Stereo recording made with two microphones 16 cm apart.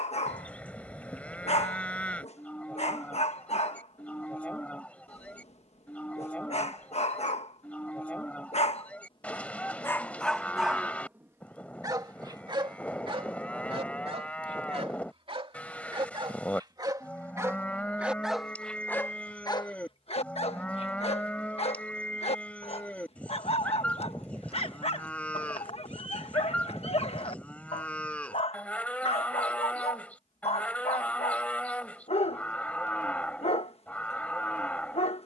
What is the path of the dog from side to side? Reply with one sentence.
You can hear the dog go right and come back.